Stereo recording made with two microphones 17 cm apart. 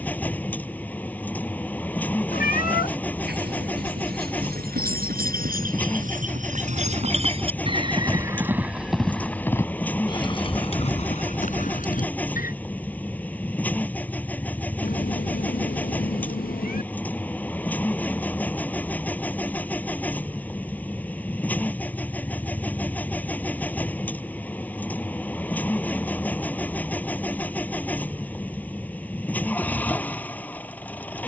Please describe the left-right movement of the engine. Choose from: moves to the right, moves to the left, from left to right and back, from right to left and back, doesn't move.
doesn't move.